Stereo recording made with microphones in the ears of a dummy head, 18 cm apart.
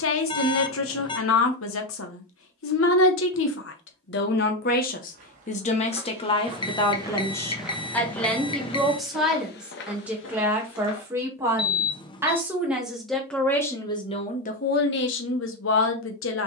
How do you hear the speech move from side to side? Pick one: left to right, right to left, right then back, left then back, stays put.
right then back.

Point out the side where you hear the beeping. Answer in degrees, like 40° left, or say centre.
20° left.